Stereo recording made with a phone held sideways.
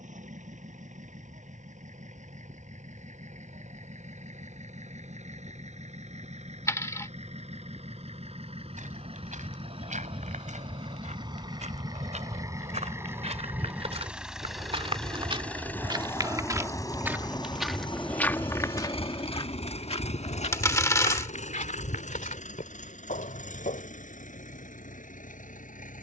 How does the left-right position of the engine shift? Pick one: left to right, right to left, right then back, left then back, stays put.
right to left.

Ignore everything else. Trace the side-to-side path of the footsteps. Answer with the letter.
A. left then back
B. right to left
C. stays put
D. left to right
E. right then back
B.